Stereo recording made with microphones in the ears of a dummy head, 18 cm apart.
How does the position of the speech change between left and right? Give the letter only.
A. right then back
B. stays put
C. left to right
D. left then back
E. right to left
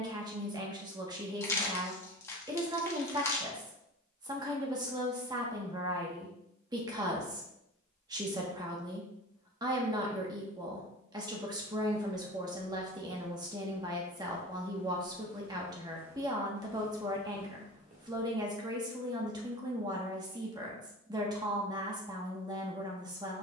B.